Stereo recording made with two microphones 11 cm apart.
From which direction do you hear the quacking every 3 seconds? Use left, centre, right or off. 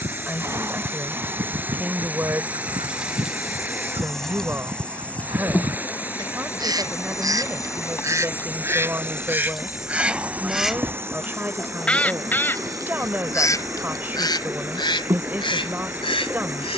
right, right, right, centre, left, left.